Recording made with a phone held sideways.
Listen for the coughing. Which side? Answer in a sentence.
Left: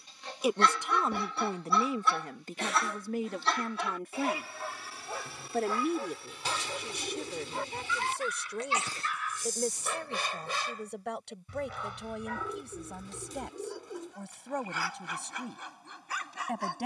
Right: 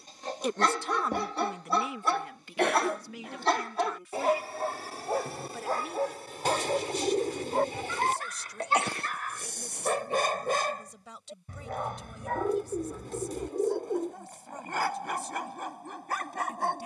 In this clip you hear the coughing on the right.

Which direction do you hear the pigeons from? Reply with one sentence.
In this clip you hear the pigeons on the right.